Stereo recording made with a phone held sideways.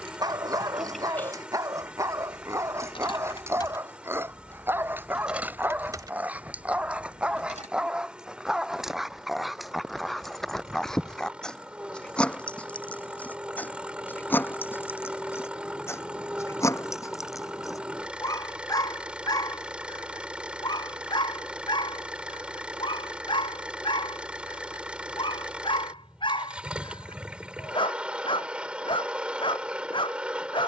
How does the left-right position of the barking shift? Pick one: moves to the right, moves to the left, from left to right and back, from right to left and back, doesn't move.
moves to the left.